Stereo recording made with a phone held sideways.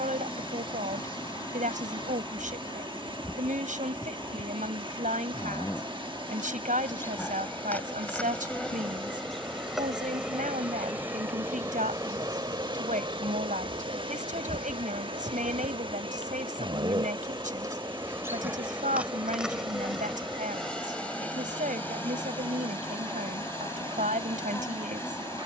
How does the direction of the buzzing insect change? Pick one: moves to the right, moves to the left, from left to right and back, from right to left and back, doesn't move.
from left to right and back.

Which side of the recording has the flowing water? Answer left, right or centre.
right.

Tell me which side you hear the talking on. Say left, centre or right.
right.